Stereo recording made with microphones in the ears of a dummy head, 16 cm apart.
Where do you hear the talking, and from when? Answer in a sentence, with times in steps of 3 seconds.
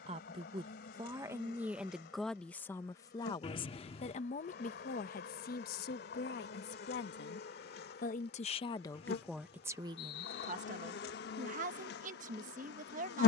In this clip you hear the talking in the centre from 0 s, on the left from 3 s and on the right from 9 s.